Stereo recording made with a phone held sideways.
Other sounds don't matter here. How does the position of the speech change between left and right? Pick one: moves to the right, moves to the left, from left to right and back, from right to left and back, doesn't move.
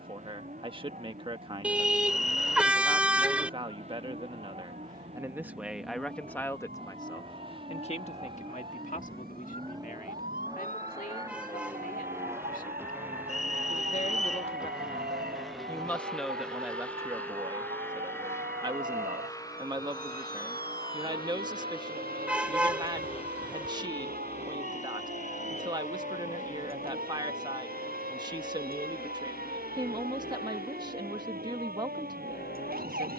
from right to left and back.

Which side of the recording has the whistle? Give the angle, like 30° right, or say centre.
50° left.